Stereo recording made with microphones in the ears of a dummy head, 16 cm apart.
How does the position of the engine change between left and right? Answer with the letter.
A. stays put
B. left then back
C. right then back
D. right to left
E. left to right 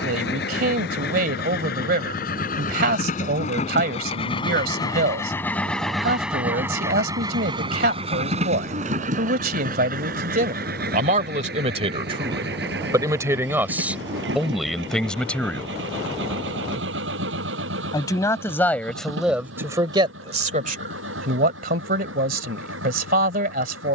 E.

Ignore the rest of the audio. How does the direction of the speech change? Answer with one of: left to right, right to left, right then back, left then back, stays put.
left then back.